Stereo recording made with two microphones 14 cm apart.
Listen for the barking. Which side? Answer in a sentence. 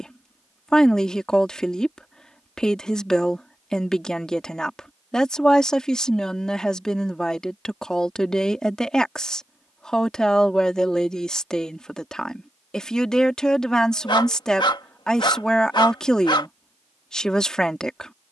You can hear the barking on the left.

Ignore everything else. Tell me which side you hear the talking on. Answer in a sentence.
In this clip you hear the talking in the centre.